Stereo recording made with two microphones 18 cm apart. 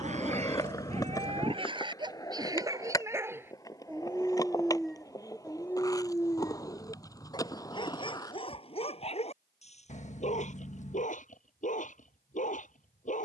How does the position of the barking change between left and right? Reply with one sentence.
You can hear the barking move from right to left.